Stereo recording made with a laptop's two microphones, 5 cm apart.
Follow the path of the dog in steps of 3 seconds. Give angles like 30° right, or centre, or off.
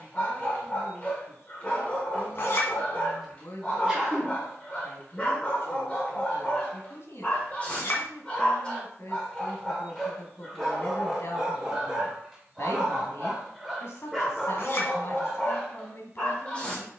30° left, 30° left, 30° left, centre, centre, 20° left.